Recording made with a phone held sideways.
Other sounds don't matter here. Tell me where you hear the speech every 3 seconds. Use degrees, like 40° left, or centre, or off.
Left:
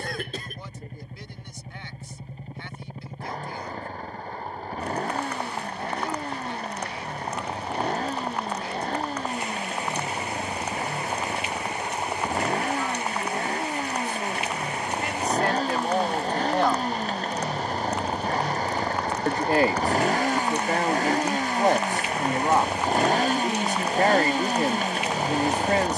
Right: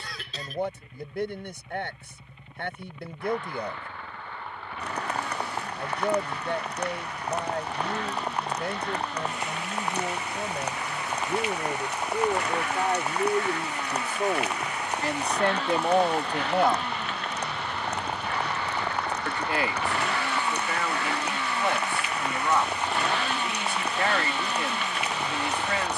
60° right, 60° right, 60° right, 60° right, 50° right, 20° right, 40° left, 40° left, 40° left.